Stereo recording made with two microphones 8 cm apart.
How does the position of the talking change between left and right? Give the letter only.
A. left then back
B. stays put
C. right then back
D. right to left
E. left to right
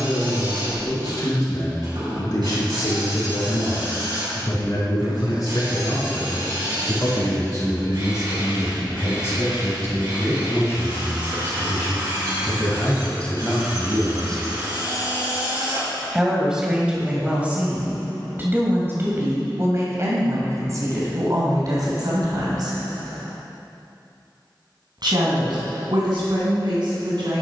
E.